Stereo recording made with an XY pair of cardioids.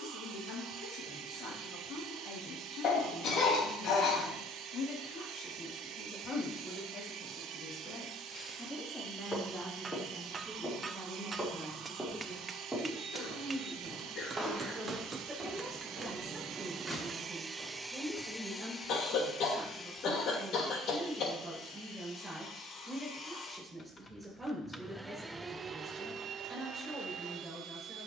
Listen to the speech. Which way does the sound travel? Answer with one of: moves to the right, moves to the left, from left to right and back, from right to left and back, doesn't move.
moves to the right.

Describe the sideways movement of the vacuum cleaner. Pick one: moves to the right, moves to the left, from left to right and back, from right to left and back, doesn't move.
from right to left and back.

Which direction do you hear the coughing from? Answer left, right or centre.
left.